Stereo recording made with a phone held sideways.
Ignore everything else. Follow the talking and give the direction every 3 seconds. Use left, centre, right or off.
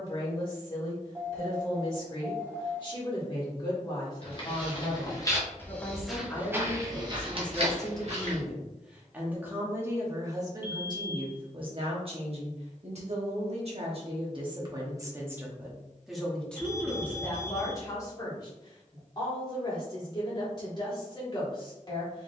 left, left, centre, right, right, centre, left, left.